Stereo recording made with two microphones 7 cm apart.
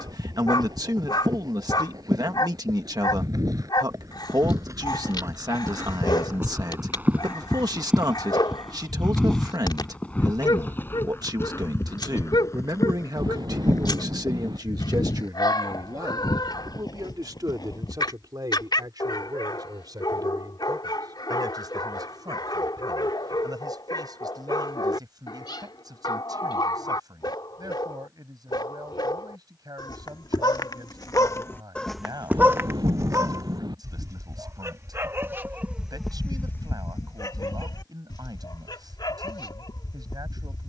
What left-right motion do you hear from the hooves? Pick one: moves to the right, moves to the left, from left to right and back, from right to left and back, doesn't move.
moves to the left.